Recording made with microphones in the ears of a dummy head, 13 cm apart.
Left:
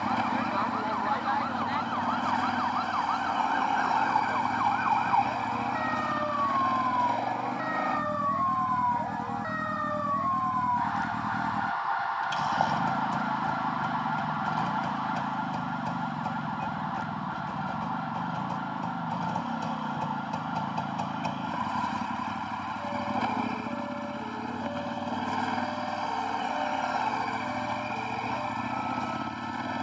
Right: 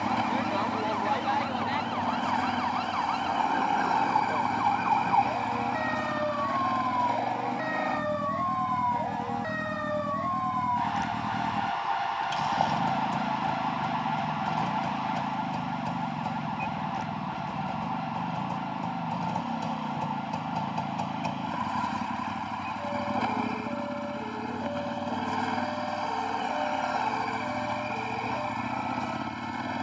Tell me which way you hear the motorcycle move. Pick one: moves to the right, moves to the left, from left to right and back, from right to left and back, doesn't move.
doesn't move.